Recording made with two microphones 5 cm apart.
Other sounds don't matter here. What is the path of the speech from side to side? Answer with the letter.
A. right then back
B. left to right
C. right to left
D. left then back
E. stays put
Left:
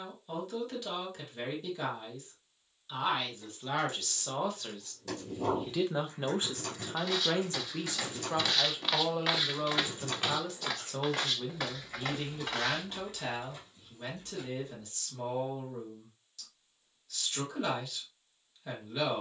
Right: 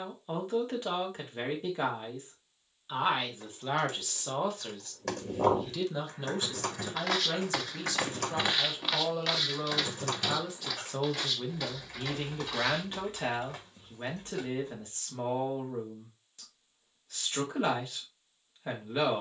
D.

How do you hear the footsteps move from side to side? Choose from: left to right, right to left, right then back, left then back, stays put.
right to left.